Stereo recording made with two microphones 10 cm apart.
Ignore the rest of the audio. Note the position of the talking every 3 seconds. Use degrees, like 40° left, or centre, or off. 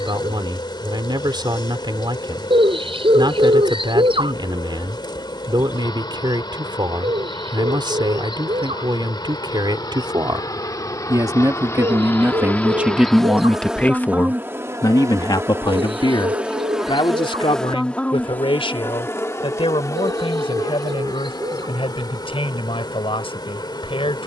60° right, 60° right, 60° right, 50° right, centre, 60° left, 80° left, 80° left.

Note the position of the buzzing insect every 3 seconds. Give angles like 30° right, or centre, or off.
60° left, 60° left, 60° left, 40° left, centre, 10° right, 30° left, 50° left.